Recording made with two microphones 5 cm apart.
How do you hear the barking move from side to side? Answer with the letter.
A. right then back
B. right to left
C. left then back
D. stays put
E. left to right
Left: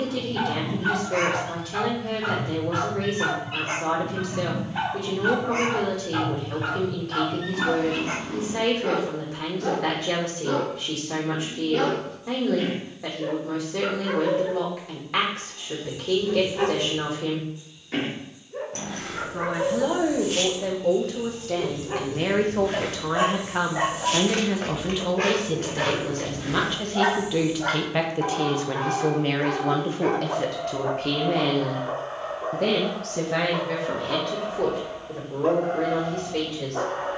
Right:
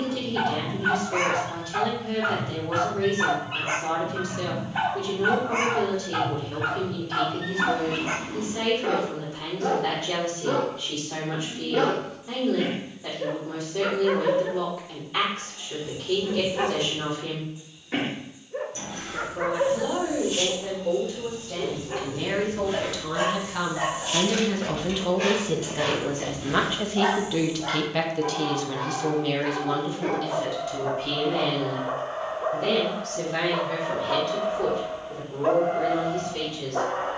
C.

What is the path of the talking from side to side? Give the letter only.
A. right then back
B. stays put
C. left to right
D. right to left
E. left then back
A.